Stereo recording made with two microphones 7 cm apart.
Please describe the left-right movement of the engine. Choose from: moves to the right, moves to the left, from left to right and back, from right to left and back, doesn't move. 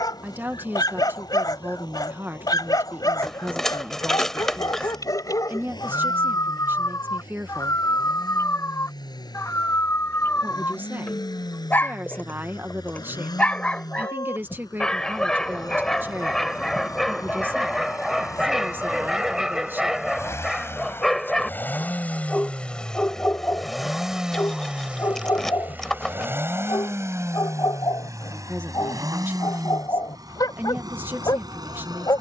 moves to the right.